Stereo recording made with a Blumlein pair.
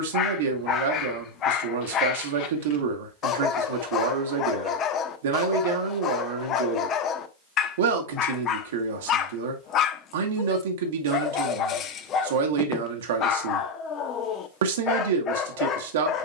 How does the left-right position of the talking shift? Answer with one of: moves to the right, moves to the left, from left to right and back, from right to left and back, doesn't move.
doesn't move.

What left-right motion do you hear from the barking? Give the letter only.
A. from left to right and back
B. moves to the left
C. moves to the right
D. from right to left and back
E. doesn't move
E.